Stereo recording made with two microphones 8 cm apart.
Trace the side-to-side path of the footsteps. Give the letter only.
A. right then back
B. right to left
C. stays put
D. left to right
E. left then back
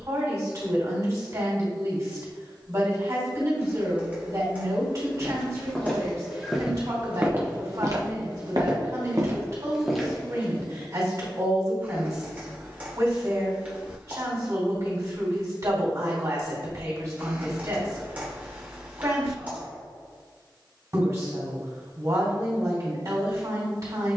A.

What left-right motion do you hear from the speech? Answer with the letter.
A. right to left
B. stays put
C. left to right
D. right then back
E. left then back
B.